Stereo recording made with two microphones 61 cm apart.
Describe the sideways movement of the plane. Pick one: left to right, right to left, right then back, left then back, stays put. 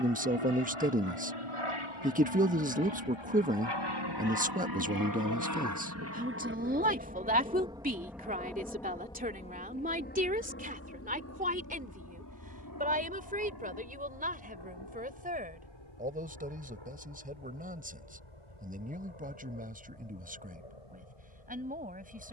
right to left.